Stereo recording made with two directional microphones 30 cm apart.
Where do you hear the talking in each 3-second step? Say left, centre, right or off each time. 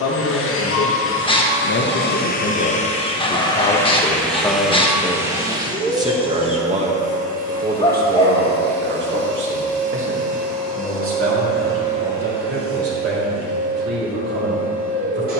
left, centre, right, right, right.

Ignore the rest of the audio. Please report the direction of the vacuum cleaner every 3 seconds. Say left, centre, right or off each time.
left, centre, right, right, right.